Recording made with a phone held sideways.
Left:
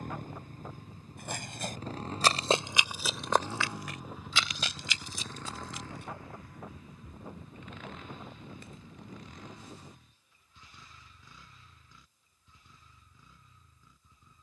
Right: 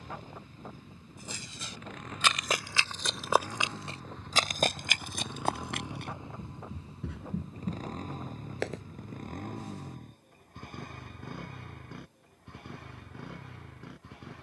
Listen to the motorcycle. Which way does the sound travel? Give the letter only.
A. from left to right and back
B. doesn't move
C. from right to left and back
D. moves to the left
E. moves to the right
E.